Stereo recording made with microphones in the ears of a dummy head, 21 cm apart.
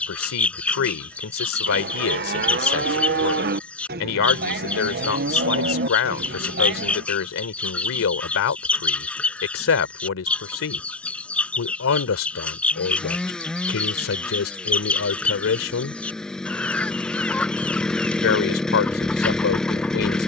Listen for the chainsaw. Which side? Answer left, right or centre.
centre.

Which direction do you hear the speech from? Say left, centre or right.
left.